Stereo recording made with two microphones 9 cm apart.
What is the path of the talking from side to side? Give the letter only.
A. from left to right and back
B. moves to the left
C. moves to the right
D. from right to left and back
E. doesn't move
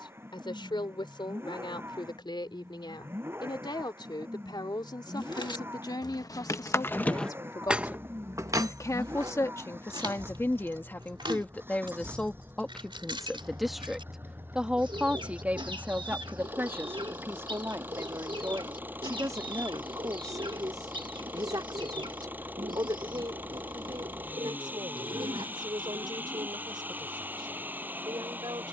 C.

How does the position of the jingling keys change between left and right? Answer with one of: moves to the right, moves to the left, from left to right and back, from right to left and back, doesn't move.
moves to the right.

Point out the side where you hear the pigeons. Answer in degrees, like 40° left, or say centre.
70° right.